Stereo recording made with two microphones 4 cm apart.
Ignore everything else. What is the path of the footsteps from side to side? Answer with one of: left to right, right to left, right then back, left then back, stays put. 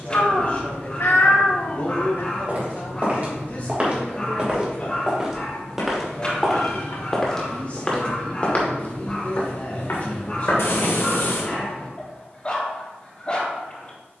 right to left.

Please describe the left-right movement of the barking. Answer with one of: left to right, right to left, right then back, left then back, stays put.
stays put.